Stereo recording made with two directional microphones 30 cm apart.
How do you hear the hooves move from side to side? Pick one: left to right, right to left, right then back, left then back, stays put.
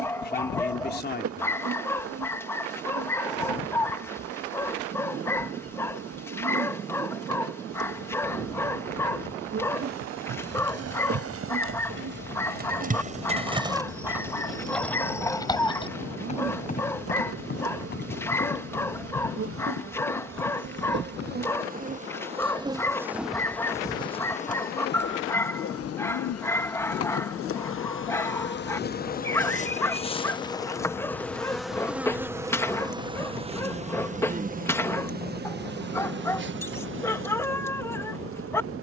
right to left.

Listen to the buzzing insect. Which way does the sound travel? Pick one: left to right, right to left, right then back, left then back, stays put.
left then back.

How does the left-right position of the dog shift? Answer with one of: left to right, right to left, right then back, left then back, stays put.
stays put.